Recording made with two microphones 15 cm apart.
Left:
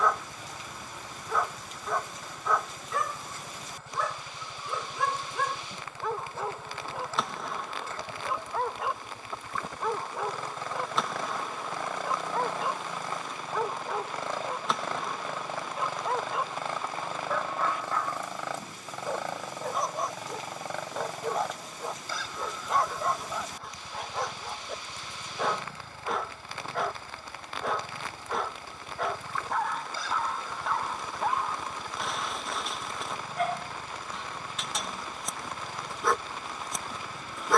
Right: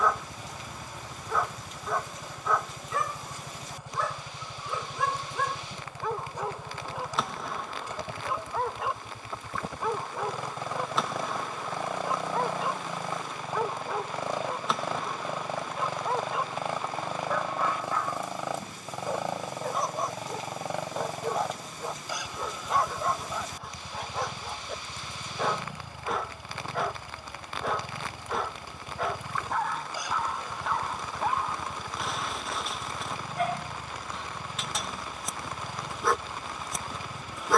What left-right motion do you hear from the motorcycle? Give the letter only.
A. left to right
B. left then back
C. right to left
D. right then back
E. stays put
E.